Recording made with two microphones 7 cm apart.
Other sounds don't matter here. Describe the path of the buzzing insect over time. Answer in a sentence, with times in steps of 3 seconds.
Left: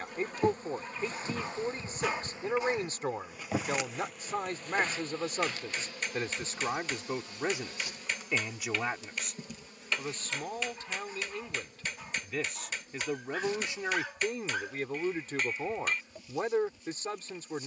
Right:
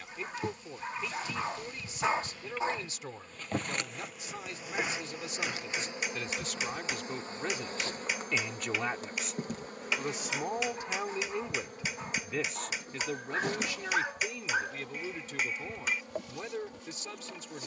You can hear the buzzing insect on the left from 0 s, in the centre from 3 s and on the right from 6 s.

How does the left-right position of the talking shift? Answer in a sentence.
You can hear the talking go right and come back.